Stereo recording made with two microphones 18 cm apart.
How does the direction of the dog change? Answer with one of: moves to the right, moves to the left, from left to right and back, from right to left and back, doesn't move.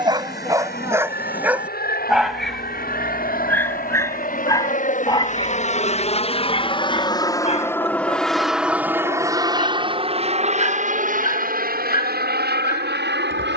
moves to the left.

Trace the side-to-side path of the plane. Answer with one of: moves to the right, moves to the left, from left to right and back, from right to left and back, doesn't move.
moves to the right.